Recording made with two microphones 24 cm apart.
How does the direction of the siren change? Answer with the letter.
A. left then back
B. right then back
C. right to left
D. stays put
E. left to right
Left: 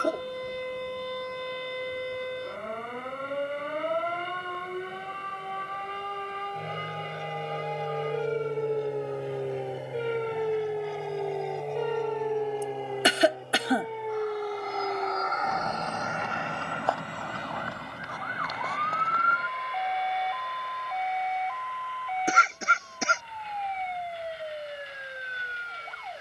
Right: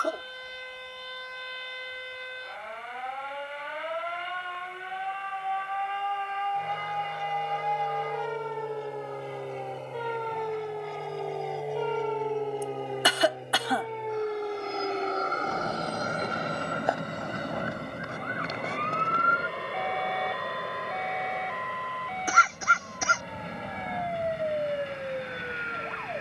E.